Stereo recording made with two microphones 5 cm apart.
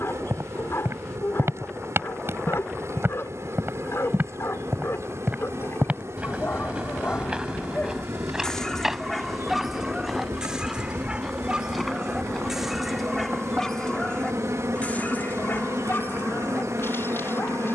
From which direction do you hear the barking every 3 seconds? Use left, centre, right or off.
left, left, left, centre, centre, left.